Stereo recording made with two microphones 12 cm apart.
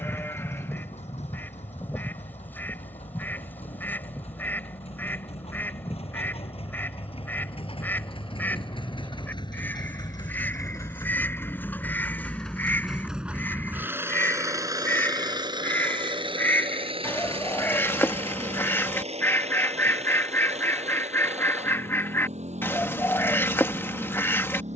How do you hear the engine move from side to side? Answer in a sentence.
You can hear the engine travel towards the right.